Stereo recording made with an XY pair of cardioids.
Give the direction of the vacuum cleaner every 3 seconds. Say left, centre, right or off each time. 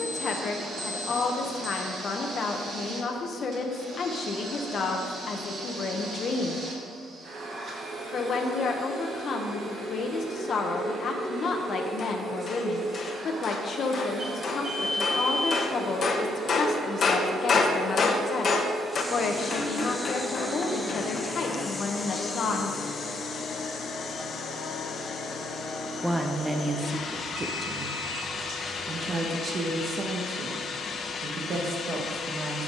right, right, right, right, right, right, centre, left, left, left, left.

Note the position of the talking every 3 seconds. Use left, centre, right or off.
left, left, left, left, left, left, left, left, centre, right, right.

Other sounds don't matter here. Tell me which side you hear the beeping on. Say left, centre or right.
right.